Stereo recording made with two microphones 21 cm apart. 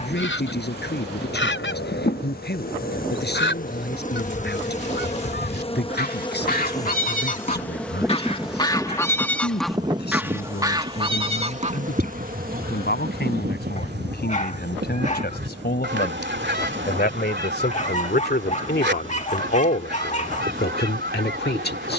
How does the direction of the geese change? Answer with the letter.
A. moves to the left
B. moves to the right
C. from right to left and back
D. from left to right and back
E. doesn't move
B.